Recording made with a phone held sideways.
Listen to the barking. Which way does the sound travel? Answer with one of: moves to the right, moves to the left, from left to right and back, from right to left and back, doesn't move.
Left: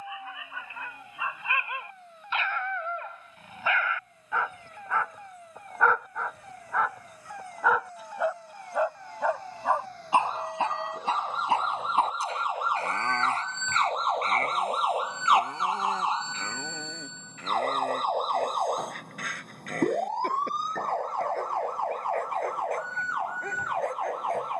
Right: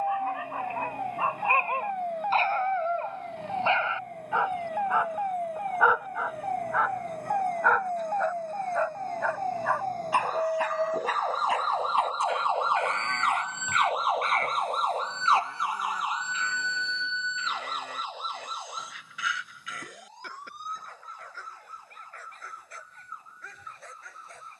moves to the left.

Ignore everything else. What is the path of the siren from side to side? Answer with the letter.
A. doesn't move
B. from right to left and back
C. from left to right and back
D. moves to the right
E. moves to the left
E.